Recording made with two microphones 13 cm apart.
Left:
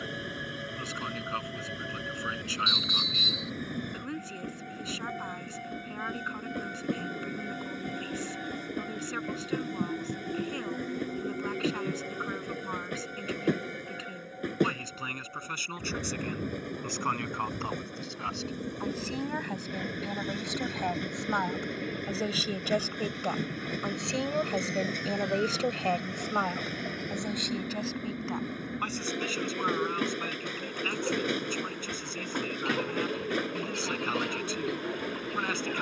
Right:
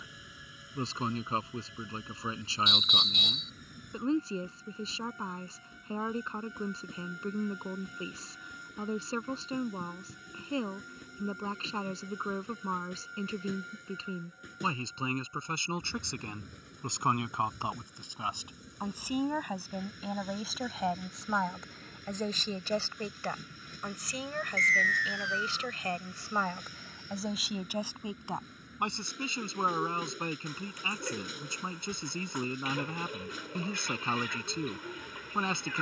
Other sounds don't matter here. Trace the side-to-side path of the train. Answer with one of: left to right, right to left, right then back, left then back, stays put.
stays put.